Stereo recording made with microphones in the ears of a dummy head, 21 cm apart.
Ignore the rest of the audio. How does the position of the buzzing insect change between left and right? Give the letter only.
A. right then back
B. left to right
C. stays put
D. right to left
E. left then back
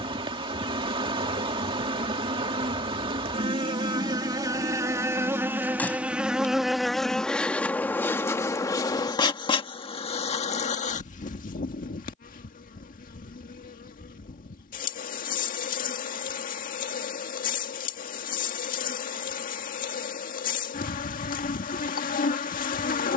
D.